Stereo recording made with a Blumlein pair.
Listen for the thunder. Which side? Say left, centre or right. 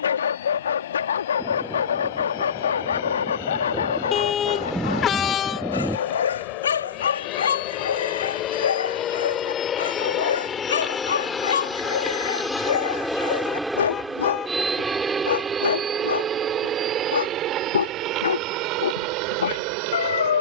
centre.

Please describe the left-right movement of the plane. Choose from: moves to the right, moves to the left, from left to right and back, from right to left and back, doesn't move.
moves to the right.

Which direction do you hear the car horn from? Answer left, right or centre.
left.